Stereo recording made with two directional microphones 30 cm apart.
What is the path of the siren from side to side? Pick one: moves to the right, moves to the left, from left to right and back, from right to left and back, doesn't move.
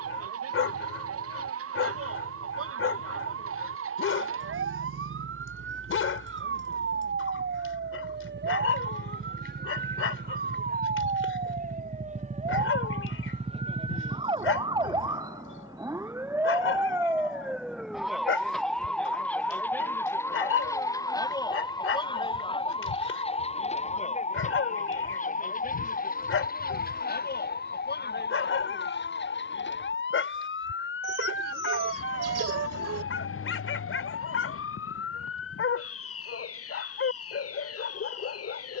moves to the left.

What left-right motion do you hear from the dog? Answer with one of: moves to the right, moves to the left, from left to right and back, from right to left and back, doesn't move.
doesn't move.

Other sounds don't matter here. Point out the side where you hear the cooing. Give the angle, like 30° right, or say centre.
60° right.